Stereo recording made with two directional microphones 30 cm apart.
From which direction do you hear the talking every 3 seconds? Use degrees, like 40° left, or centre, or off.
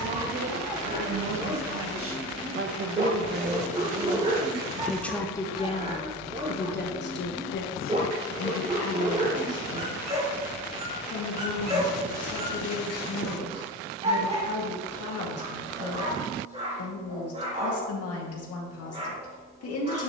60° right, 10° right, 40° left, 60° left, 60° left, 60° left, 60° left.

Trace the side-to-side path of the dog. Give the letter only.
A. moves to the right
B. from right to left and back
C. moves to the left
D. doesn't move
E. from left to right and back
D.